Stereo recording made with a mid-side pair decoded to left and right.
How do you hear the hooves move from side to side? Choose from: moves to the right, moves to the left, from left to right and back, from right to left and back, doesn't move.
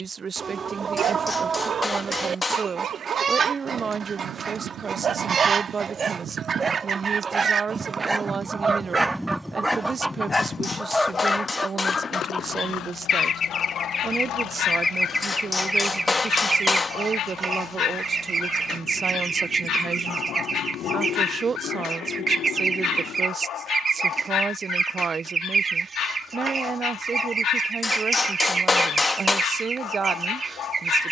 moves to the left.